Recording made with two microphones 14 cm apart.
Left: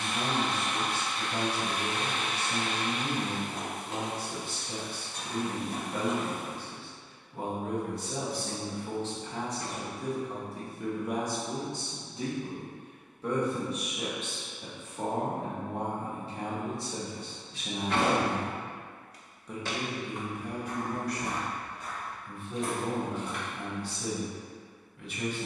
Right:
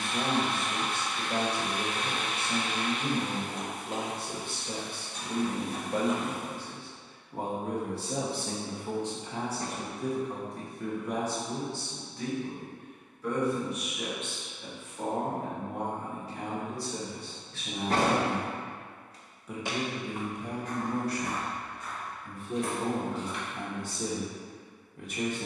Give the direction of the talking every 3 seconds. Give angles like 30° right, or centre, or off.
50° right, 50° right, 30° right, centre, 30° left, 30° left, 10° right, 40° right, 40° right.